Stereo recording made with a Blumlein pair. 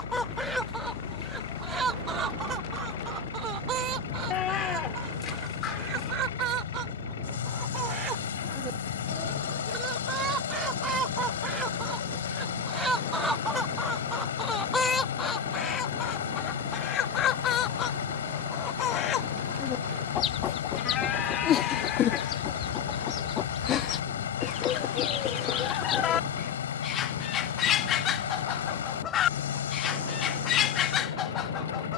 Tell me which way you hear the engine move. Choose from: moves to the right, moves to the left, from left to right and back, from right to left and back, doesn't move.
doesn't move.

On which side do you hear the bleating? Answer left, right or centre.
left.